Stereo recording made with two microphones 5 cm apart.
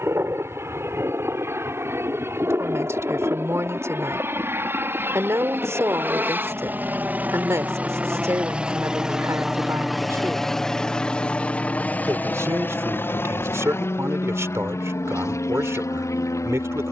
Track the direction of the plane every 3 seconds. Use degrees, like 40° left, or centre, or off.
60° right, 50° right, 30° right, 10° left, 40° left, 60° left.